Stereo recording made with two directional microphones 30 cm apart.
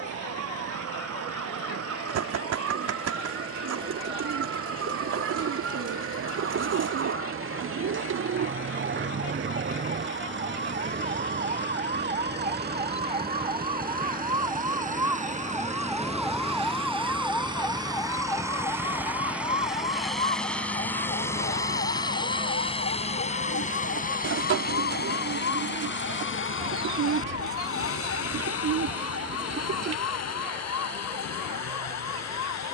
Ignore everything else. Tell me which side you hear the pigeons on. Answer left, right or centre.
right.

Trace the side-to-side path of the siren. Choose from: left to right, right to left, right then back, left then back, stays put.
right to left.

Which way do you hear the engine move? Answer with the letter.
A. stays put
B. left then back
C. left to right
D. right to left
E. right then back
D.